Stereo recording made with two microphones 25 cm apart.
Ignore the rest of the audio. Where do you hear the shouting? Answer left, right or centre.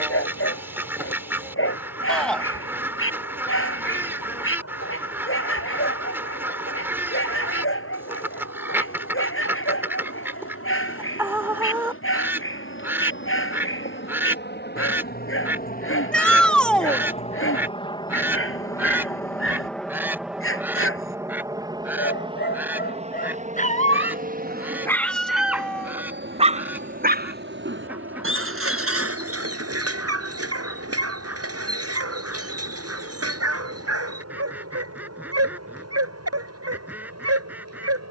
centre.